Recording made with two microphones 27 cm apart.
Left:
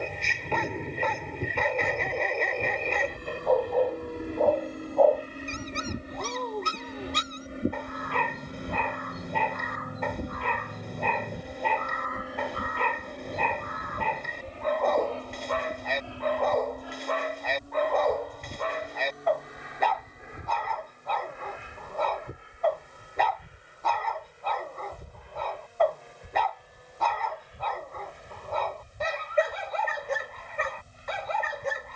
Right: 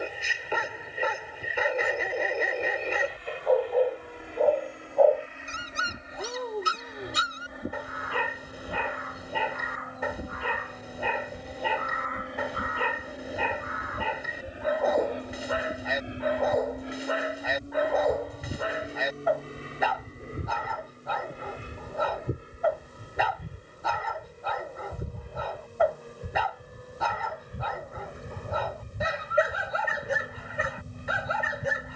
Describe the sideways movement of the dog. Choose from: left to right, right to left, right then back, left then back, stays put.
stays put.